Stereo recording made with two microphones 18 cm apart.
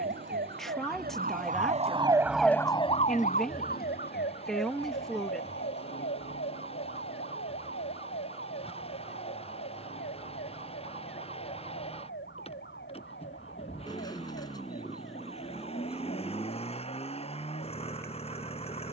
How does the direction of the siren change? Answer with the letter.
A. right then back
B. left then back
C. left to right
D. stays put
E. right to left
E.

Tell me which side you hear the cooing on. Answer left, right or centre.
left.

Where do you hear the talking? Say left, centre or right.
centre.